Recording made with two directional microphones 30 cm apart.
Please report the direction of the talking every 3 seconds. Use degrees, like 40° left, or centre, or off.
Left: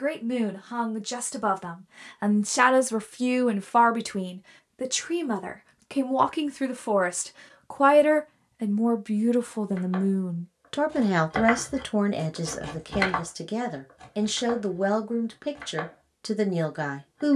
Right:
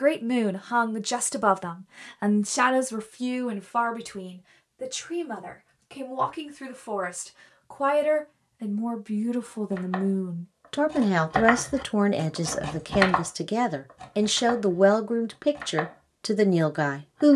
10° right, 50° left, 40° left, 10° left, 20° right, 30° right.